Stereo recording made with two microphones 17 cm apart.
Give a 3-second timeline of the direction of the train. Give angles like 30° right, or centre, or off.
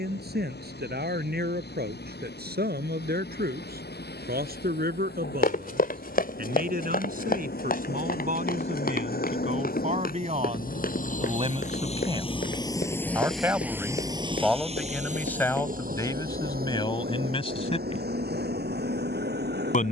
80° left, 80° left, 70° left, 60° left, centre, 60° right, 70° right.